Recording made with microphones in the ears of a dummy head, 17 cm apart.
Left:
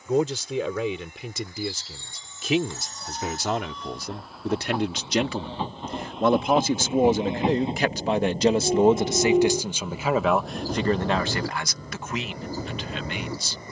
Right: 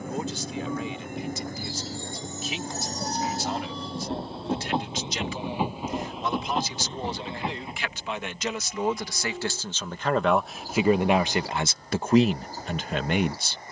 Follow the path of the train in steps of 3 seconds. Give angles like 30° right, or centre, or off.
40° right, 20° right, 20° left, 60° left, 80° left.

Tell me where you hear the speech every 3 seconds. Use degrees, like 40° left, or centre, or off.
60° left, 50° left, 40° left, centre, 40° right.